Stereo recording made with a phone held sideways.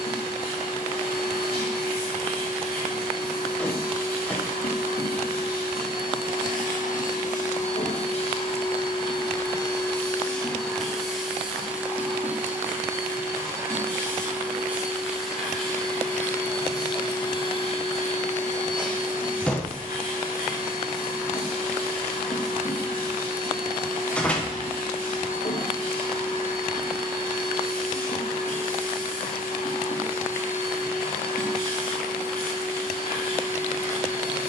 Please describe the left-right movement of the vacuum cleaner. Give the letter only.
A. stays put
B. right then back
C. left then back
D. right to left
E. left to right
B.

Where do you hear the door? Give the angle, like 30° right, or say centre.
10° left.